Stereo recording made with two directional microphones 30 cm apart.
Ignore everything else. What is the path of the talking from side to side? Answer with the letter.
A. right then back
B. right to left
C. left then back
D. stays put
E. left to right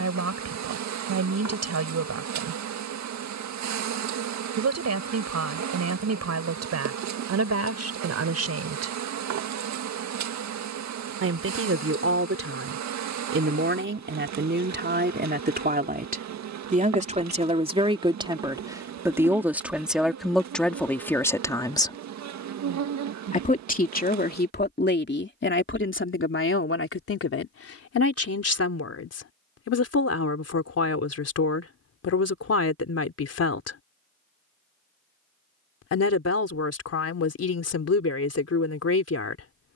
B.